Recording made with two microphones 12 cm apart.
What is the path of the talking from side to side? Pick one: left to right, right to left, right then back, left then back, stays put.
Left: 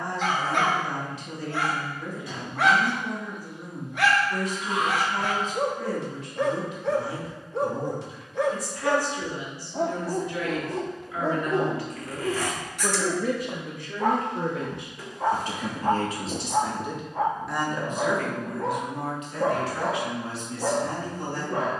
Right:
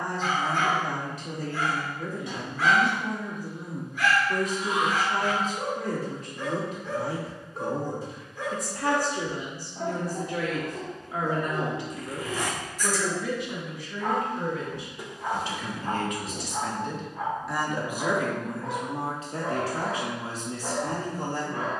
left then back.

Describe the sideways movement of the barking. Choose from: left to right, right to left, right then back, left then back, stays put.
stays put.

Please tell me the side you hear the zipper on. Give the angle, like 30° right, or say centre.
20° right.